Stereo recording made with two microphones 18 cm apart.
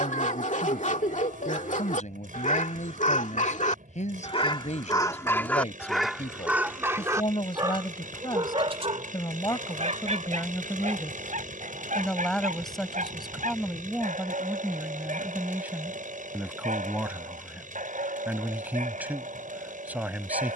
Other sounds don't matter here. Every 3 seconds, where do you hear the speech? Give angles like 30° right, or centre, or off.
50° left, 40° left, 30° left, 20° left, centre, 10° right, 10° right.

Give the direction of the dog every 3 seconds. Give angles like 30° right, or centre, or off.
50° left, 30° left, 20° right, 40° right, 50° right, 50° right, 50° right.